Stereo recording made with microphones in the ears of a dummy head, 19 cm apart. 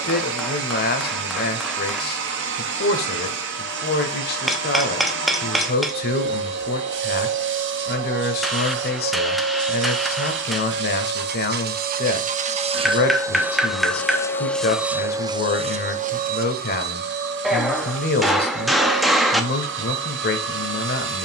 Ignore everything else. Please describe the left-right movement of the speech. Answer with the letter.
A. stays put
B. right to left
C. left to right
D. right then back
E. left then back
A.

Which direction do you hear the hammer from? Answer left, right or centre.
centre.